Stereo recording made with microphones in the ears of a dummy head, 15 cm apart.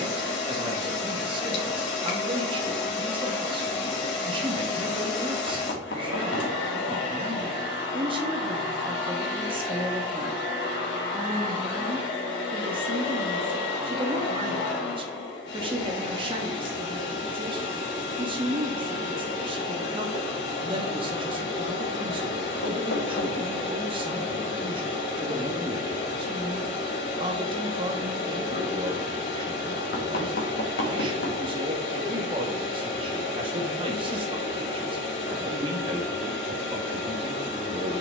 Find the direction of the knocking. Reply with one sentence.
In this clip you hear the knocking on the left.